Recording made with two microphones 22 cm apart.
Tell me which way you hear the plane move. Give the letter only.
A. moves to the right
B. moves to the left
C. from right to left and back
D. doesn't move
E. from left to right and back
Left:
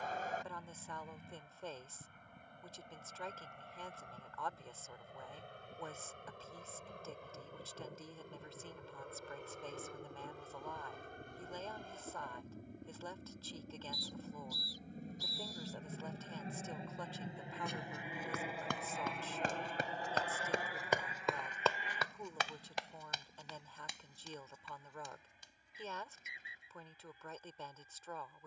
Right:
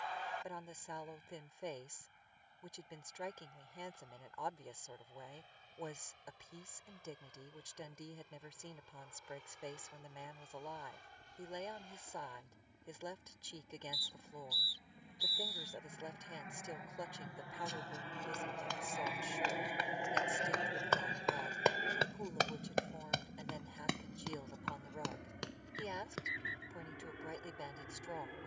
A.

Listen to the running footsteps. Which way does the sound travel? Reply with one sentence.
In this clip you hear the running footsteps move from left to right.